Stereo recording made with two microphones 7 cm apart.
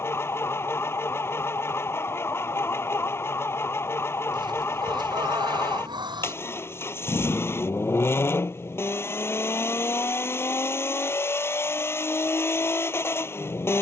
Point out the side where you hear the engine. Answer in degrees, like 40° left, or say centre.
30° left.